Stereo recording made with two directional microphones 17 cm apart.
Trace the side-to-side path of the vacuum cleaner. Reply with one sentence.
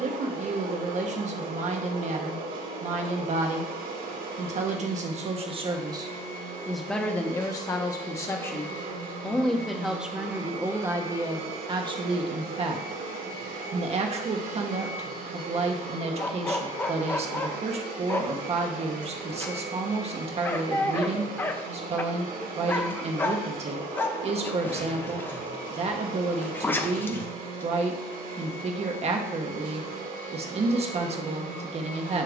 In this clip you hear the vacuum cleaner stay in one place.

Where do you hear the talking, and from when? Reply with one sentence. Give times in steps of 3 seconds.
In this clip you hear the talking on the right from 0 s, in the centre from 6 s and on the right from 12 s.